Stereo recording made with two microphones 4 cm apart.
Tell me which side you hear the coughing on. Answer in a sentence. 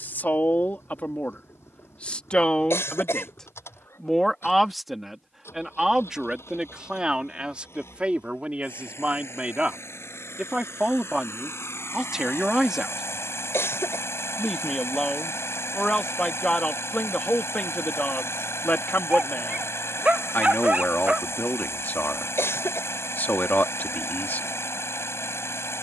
You can hear the coughing on the left.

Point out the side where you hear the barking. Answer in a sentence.
You can hear the barking on the right.